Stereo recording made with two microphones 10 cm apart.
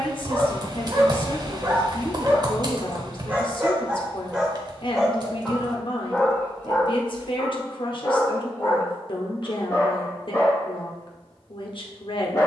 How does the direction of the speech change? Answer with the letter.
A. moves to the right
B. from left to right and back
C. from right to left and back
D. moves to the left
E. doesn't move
E.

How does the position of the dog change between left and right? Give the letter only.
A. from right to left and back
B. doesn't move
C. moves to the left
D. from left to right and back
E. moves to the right
C.